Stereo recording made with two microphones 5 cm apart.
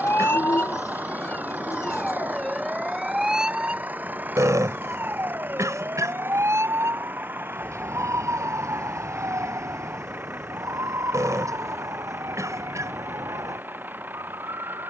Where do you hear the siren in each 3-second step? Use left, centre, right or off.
left, right, right, right, right.